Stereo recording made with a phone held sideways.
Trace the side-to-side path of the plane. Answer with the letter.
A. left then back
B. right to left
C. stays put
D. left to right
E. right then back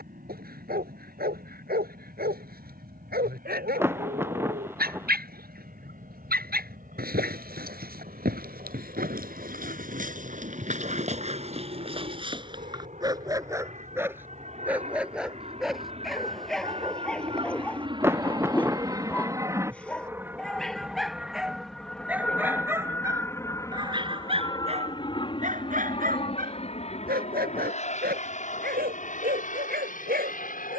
B.